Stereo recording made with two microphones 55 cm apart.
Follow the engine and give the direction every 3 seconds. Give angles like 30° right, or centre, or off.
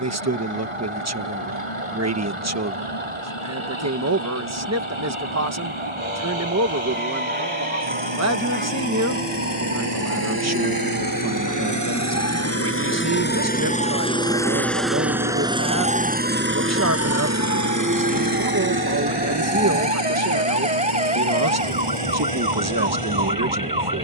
70° left, 60° left, 50° left, 40° left, 20° left, 20° right, 50° right, 60° right.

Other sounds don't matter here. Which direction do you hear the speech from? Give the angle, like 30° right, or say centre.
30° right.